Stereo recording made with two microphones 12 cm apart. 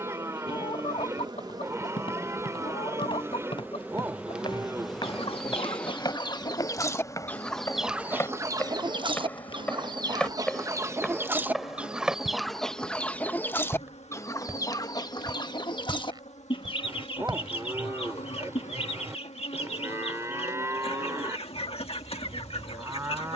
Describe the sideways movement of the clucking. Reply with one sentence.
In this clip you hear the clucking move from left to right and back again.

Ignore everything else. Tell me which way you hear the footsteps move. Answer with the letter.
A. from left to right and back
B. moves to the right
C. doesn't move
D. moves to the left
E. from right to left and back
B.